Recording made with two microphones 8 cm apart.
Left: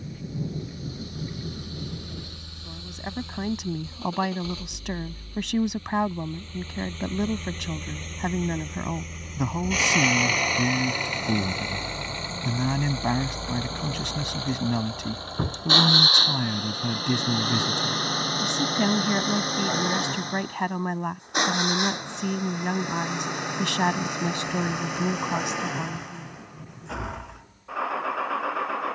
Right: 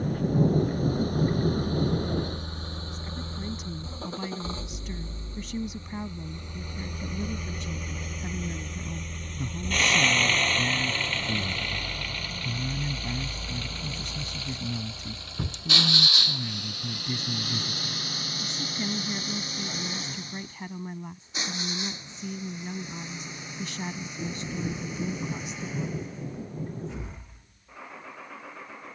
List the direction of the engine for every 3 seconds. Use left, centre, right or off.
right, right, centre, centre, left, left, left, left, left, left.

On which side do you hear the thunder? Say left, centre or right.
right.